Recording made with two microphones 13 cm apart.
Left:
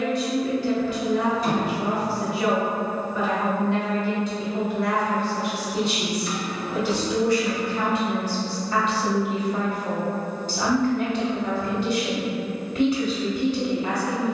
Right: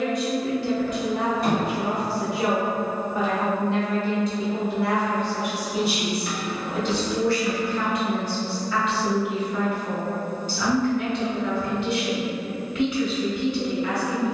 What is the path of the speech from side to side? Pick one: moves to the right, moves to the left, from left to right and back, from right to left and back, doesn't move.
moves to the left.